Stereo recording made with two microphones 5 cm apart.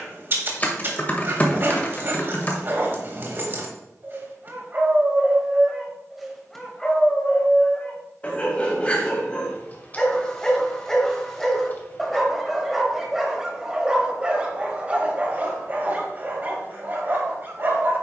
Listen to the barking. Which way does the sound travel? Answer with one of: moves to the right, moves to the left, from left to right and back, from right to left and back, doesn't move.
from right to left and back.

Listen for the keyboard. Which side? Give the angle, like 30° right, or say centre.
30° left.